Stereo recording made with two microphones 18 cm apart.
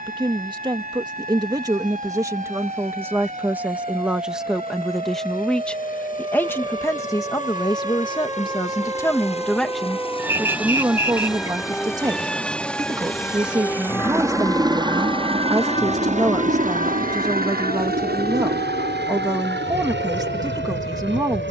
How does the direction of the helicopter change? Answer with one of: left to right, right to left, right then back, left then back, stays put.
left to right.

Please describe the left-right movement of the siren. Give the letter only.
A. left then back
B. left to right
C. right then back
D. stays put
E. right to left
E.